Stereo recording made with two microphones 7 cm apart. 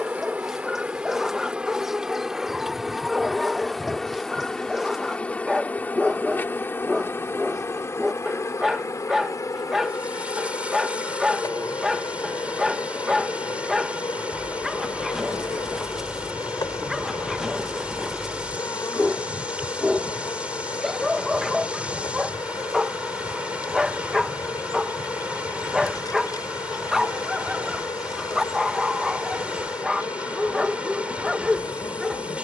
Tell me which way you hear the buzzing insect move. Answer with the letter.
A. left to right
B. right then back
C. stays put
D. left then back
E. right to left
E.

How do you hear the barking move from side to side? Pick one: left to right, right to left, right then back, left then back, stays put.
stays put.